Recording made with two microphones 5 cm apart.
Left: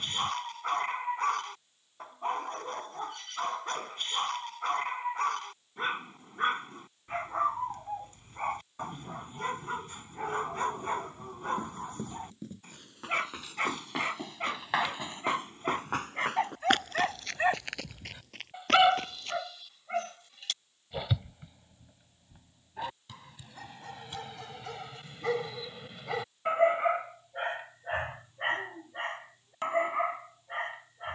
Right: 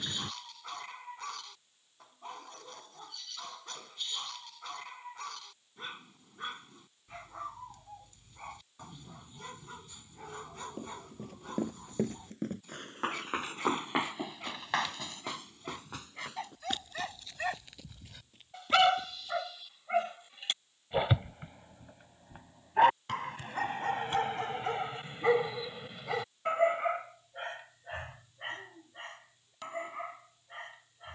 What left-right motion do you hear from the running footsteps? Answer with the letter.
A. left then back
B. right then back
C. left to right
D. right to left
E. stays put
D.